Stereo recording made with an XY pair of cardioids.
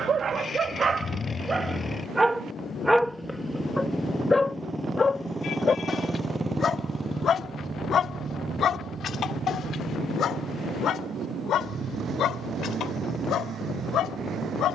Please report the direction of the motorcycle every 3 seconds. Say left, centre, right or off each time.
left, centre, right, right, right.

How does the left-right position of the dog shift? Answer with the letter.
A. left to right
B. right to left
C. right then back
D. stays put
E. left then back
B.